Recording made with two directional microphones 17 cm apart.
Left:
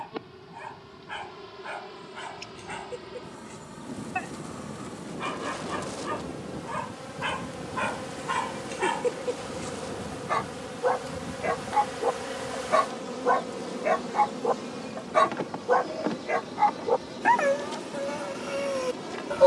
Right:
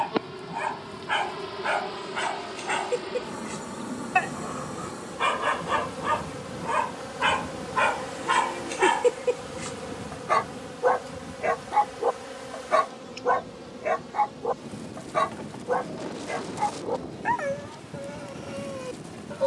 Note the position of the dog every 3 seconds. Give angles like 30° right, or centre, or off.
60° right, 50° right, 40° right, 20° right, 10° left, 30° left, 50° left.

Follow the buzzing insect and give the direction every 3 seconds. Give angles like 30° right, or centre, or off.
50° right, 40° right, 20° right, 10° left, 40° left, 60° left, 60° left.